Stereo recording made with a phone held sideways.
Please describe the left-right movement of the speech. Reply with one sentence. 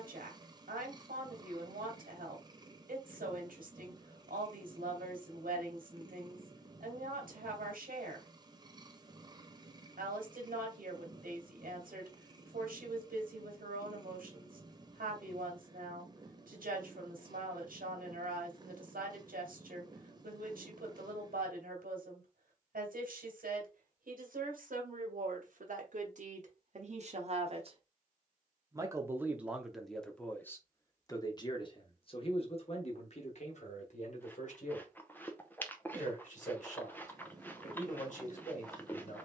In this clip you hear the speech move from right to left.